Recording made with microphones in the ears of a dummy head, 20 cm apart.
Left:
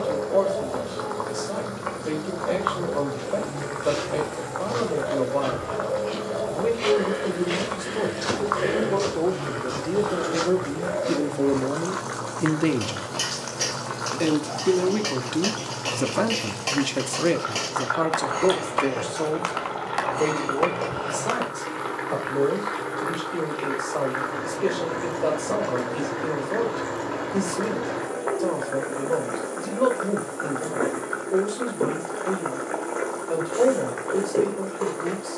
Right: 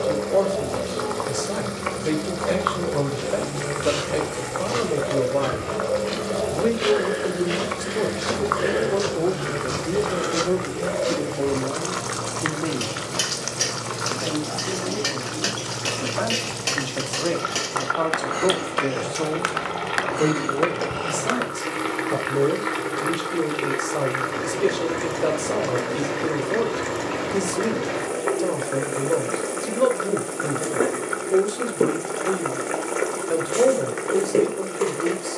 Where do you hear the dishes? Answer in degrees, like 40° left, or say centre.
20° right.